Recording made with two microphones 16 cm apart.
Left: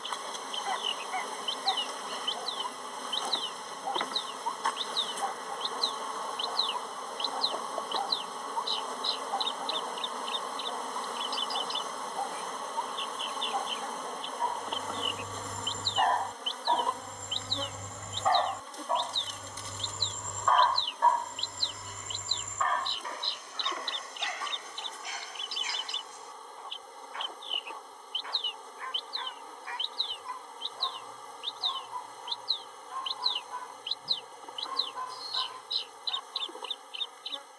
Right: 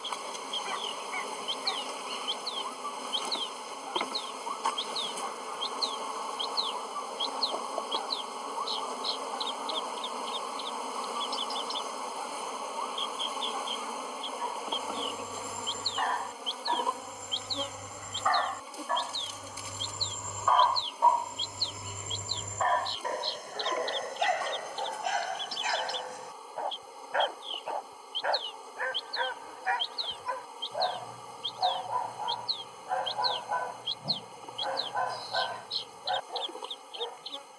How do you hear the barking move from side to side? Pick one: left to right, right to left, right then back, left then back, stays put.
left to right.